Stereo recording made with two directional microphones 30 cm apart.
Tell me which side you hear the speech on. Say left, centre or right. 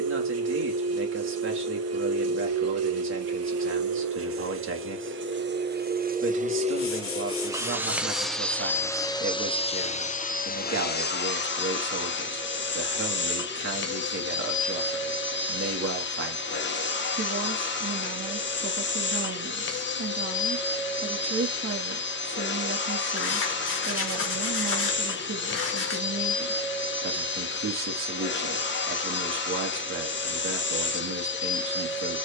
right.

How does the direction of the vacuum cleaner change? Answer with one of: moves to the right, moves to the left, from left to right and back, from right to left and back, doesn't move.
moves to the left.